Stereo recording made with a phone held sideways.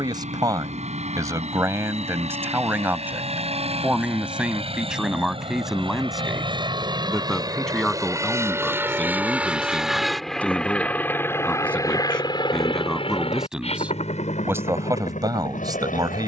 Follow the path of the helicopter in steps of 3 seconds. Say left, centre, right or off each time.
right, right, right, centre, left, left.